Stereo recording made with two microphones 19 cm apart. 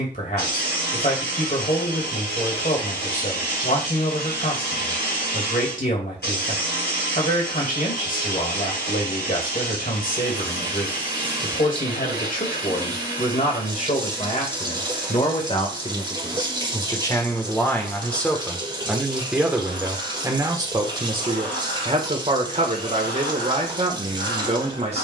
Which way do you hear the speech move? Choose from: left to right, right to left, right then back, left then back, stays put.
left to right.